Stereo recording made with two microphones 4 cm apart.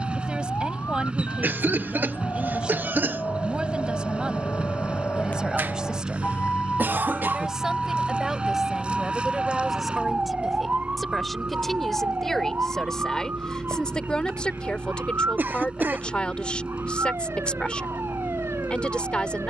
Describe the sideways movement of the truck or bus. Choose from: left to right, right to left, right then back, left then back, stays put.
stays put.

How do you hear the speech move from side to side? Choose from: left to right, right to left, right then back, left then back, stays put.
right to left.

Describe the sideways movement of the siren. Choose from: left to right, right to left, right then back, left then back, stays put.
left to right.